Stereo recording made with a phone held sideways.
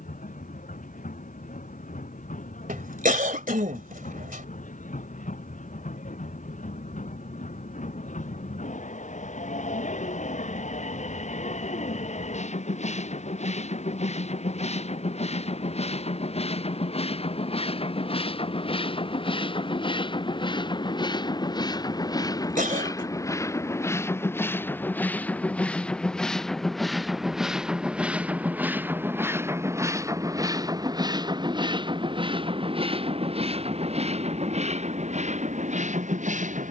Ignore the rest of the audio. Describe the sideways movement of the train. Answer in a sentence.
In this clip you hear the train move from left to right.